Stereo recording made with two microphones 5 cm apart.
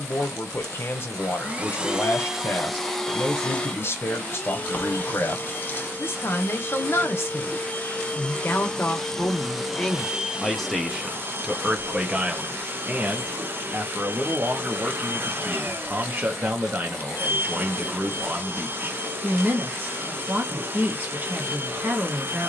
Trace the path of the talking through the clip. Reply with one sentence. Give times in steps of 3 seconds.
In this clip you hear the talking on the left from 0 s, in the centre from 9 s and on the right from 12 s.